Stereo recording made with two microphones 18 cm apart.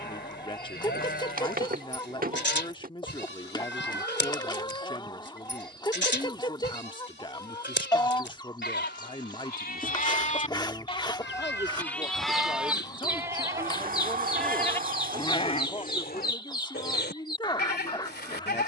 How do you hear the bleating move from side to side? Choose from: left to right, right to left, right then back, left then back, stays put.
right then back.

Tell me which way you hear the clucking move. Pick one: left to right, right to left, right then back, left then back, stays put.
stays put.